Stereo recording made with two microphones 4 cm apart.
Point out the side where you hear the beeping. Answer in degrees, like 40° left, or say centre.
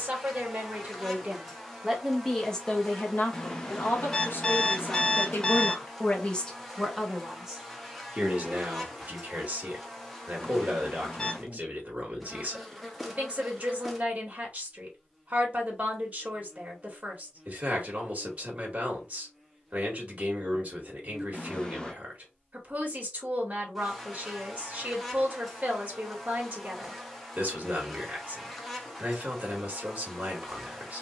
20° left.